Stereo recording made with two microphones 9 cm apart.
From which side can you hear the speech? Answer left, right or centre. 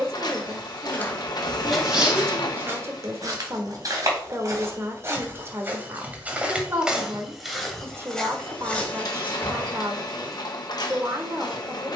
right.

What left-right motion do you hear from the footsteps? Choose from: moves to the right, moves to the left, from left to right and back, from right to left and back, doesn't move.
from left to right and back.